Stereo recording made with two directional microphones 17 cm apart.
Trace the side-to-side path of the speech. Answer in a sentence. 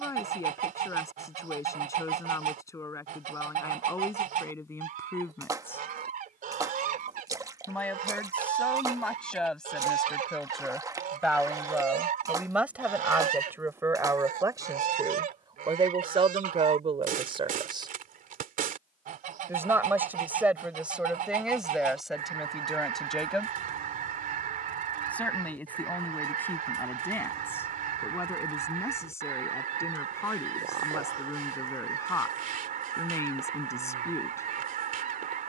You can hear the speech go right and come back.